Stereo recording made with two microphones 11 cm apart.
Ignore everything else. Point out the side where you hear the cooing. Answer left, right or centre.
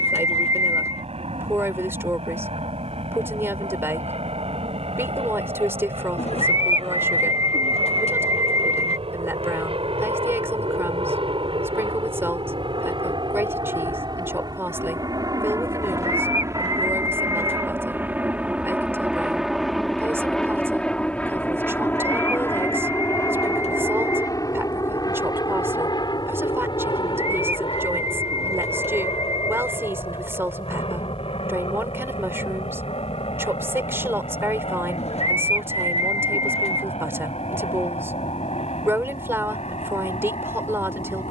left.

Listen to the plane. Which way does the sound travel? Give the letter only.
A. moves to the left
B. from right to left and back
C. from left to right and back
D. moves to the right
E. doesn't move
A.